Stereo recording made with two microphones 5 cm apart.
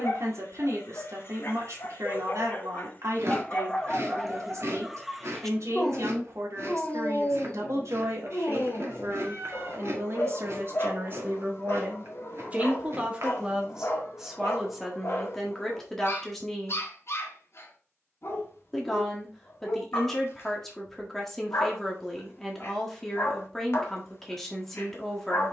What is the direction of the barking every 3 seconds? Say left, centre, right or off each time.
left, centre, left, left, left, left, left, left, left.